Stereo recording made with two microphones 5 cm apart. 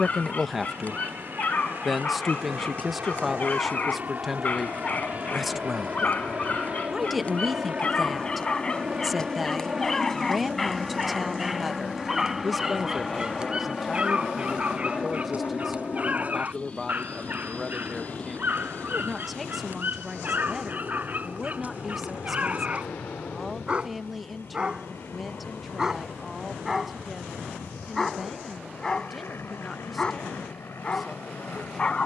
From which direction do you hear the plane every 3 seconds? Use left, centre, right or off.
right, right, right, centre, centre, left, left, left, left, left, left.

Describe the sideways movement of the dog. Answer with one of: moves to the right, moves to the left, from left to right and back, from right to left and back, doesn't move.
from left to right and back.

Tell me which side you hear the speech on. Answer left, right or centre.
centre.